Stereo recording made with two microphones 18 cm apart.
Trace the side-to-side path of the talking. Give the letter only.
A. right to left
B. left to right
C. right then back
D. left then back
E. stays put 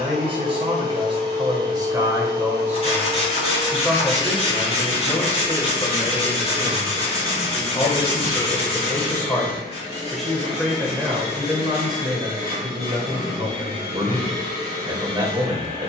D.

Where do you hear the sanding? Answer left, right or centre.
left.